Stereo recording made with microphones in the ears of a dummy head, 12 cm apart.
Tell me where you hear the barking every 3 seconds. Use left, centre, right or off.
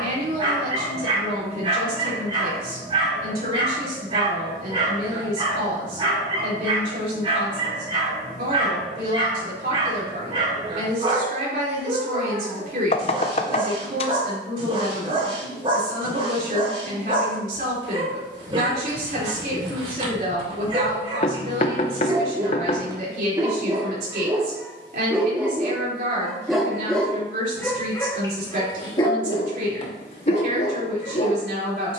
right, right, right, right, right, right, right, right, centre, left, left.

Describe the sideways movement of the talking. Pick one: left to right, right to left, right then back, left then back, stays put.
stays put.